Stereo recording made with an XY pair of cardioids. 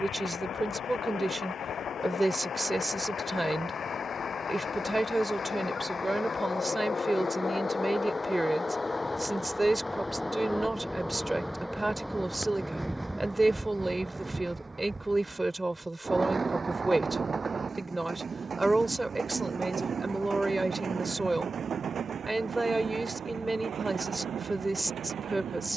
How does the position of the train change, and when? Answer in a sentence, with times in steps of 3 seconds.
In this clip you hear the train on the left from 0 s, in the centre from 9 s and on the right from 15 s.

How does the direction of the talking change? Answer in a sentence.
In this clip you hear the talking stay put.